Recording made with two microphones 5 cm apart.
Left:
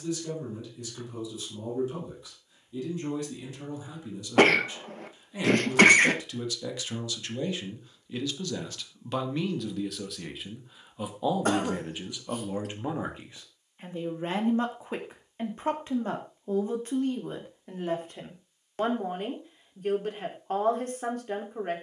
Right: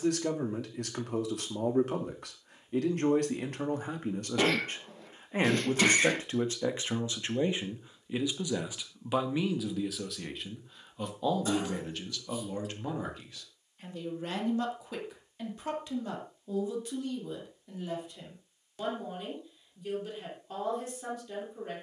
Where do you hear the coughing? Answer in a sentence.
You can hear the coughing on the left.